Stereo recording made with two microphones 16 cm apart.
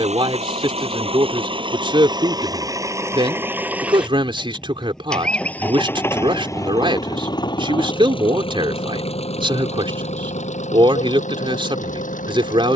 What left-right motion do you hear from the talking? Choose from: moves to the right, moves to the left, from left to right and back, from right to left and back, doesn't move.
doesn't move.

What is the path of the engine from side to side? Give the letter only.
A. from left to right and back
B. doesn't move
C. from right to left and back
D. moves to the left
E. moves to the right
D.